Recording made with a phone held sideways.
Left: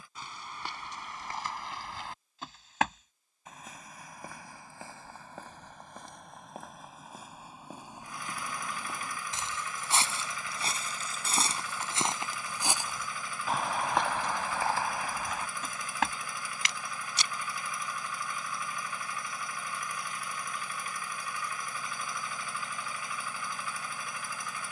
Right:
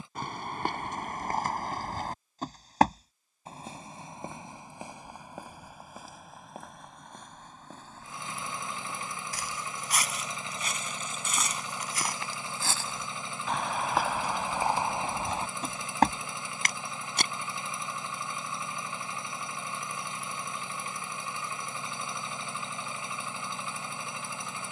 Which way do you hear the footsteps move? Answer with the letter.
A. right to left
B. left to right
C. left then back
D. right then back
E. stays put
C.